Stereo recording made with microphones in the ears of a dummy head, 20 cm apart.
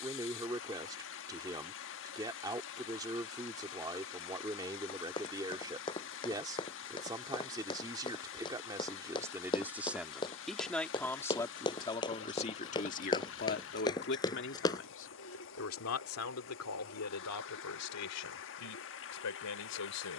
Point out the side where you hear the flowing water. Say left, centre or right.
left.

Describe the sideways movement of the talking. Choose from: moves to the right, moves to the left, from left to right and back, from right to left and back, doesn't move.
moves to the left.